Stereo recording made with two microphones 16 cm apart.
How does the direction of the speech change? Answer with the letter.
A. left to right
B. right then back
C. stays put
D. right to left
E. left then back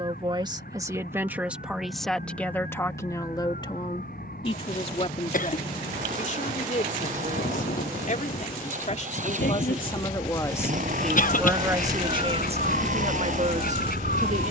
E.